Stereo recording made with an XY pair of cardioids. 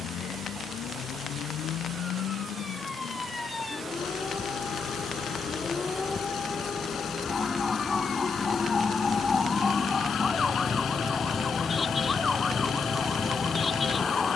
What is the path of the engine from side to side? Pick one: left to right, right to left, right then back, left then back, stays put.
stays put.